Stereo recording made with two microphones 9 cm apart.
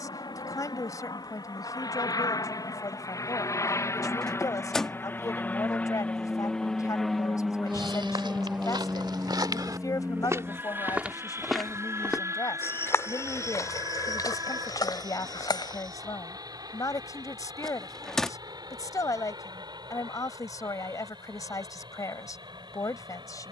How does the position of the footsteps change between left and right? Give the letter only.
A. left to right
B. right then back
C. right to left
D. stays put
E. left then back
C.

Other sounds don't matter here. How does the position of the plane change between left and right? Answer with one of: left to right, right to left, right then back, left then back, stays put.
left to right.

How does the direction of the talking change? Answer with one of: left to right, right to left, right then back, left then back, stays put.
stays put.